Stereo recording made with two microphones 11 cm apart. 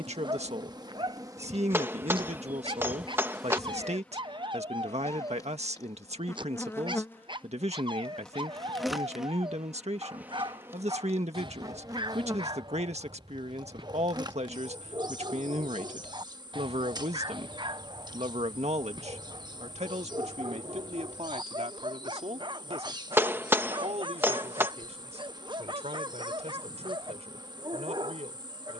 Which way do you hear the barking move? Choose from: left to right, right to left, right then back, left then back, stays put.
stays put.